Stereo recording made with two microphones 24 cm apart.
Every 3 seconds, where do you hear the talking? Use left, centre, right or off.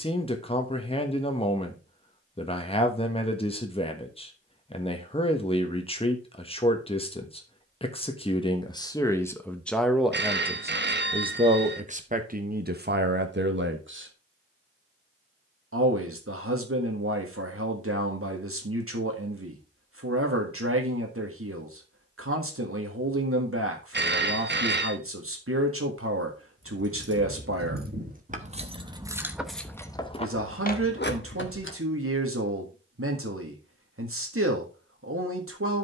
left, left, left, centre, right, right, right, right, right, right, right, right.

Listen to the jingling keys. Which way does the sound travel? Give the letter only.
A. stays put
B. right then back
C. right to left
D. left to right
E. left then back
C.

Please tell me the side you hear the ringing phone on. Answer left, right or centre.
right.